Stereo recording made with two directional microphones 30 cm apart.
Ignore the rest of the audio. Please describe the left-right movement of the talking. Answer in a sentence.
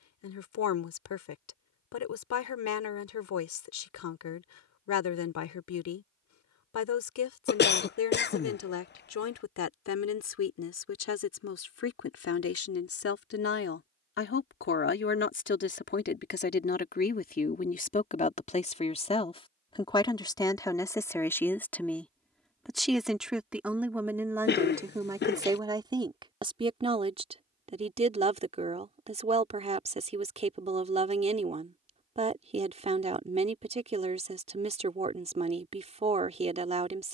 You can hear the talking go from the left side to the right.